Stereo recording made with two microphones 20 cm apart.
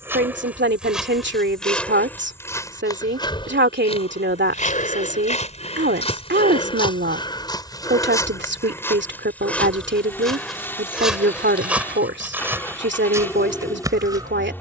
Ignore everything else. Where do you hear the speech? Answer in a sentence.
You can hear the speech on the right.